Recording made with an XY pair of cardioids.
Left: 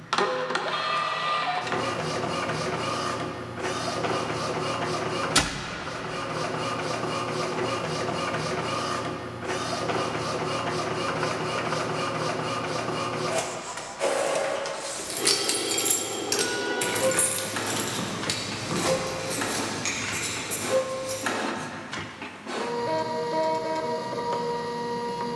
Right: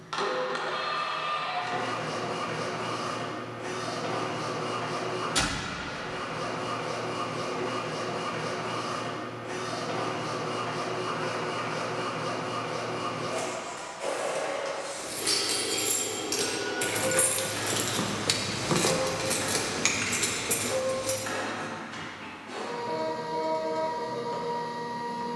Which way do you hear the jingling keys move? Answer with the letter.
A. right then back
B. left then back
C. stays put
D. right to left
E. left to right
E.